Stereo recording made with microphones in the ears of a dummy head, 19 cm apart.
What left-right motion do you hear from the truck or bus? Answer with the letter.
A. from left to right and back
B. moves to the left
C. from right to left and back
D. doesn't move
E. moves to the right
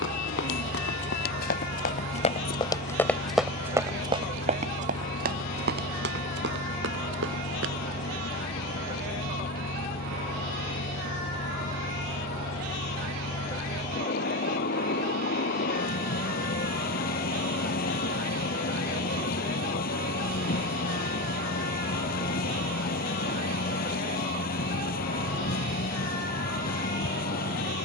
D.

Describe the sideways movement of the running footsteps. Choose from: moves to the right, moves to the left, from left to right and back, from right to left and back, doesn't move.
moves to the right.